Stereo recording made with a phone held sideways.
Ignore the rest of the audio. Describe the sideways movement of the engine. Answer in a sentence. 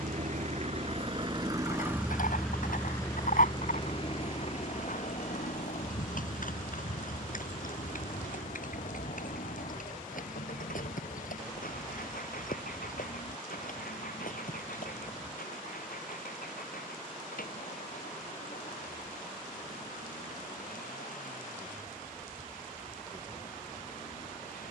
You can hear the engine go from the right side to the left.